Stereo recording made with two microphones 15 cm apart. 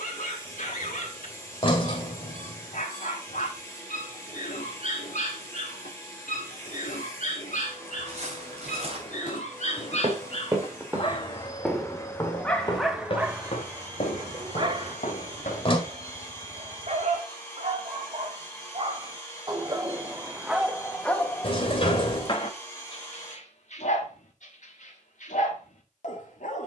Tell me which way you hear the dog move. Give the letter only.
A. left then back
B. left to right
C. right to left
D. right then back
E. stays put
D.